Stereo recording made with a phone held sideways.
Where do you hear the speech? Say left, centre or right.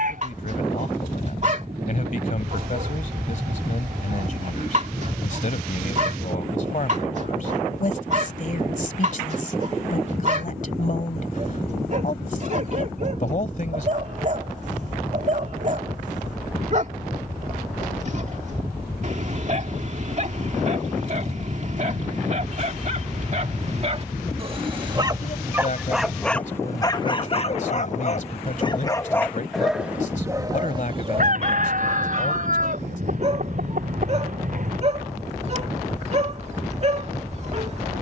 left.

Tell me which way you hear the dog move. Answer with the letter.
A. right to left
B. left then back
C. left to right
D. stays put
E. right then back
B.